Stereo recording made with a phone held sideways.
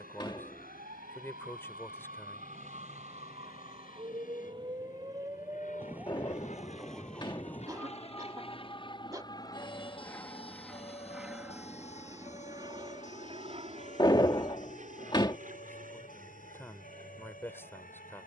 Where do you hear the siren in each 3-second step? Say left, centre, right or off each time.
right, right, centre, left, left, left.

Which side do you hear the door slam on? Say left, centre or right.
left.